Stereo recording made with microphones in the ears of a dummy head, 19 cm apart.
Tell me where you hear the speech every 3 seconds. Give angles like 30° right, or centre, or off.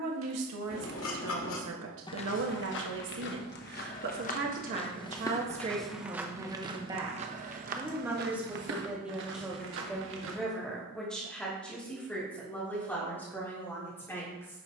70° right, 40° right, 10° right, centre, 10° left.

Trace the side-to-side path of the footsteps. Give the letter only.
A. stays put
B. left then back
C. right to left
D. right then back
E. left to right
B.